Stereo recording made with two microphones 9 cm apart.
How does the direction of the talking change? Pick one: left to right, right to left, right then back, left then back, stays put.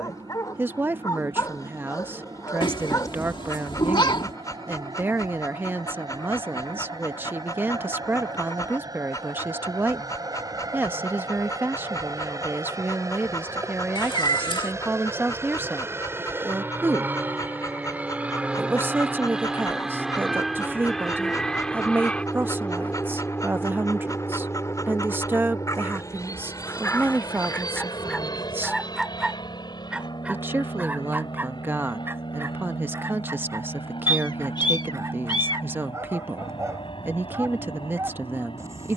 stays put.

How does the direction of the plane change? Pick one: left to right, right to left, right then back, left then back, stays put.
right to left.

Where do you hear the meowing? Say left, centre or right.
left.